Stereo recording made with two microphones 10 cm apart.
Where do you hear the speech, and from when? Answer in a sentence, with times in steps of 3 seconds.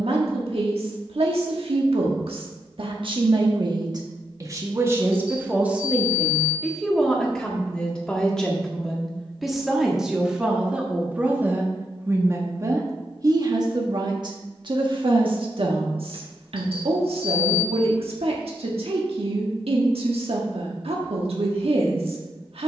In this clip you hear the speech on the right from 0 s, in the centre from 6 s and on the right from 12 s.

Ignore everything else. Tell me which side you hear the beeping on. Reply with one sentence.
You can hear the beeping on the right.